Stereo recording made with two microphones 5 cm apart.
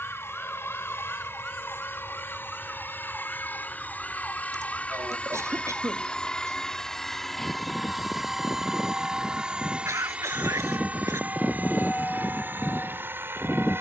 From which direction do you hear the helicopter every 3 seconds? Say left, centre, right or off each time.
left, left, centre, right, right.